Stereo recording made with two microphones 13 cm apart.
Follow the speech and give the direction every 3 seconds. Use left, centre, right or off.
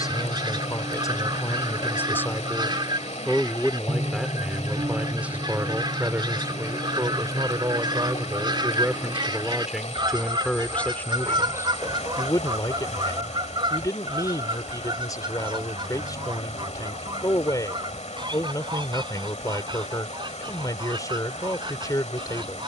left, centre, right, centre, left, left, left, left.